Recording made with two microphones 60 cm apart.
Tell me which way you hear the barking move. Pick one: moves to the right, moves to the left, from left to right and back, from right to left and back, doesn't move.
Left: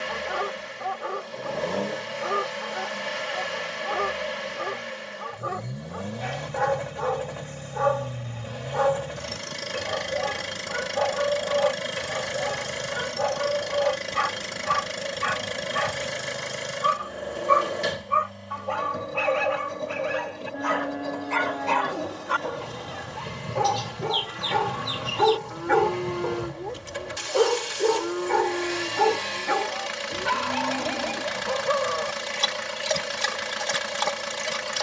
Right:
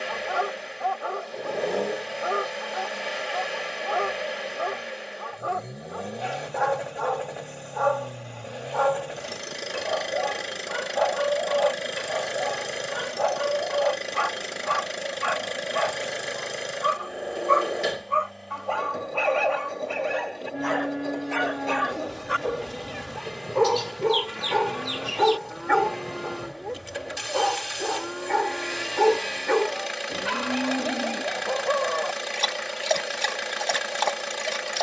from left to right and back.